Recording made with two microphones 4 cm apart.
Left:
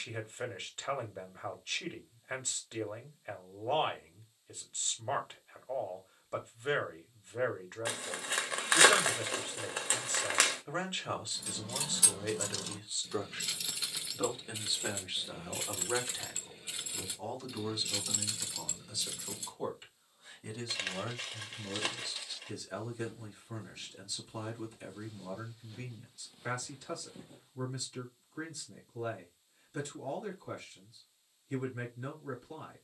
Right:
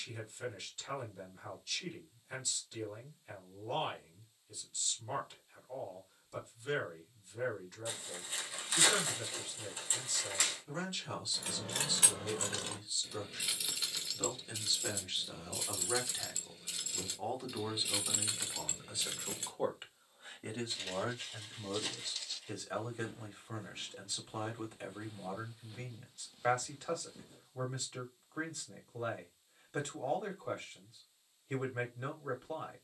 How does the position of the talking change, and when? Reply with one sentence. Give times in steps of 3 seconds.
In this clip you hear the talking on the left from 0 s, in the centre from 15 s and on the right from 18 s.